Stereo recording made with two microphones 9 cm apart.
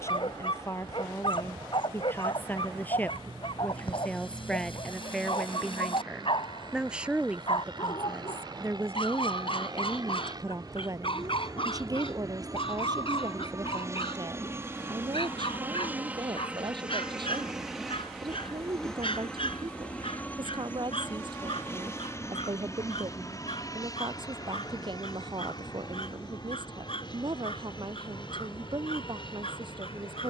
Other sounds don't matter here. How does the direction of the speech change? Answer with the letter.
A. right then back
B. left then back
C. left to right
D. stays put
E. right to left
C.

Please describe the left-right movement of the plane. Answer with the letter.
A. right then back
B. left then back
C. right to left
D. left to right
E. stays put
C.